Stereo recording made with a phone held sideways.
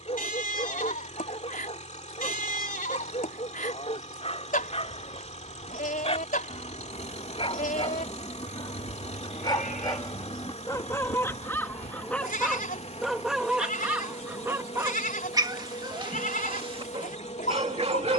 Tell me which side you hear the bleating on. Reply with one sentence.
In this clip you hear the bleating on the left.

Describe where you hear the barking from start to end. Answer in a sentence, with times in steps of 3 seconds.
In this clip you hear the barking on the left from 0 s, in the centre from 12 s and on the right from 15 s.